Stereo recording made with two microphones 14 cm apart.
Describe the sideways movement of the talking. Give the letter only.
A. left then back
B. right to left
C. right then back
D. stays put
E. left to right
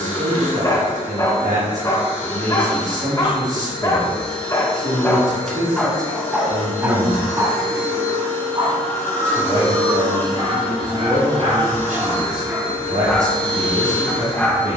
D.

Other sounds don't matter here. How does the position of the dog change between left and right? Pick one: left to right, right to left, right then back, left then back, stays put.
right then back.